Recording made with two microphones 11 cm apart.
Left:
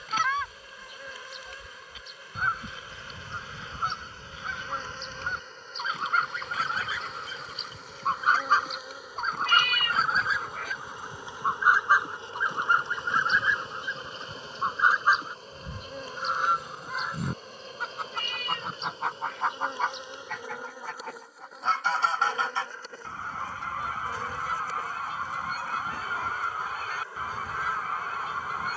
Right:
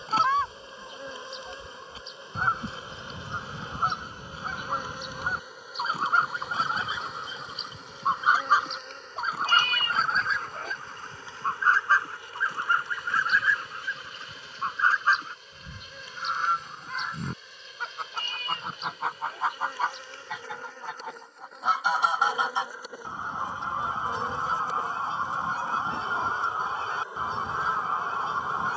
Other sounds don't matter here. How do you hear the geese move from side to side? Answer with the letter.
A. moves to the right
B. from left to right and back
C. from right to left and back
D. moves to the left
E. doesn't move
C.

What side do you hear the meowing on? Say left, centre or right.
right.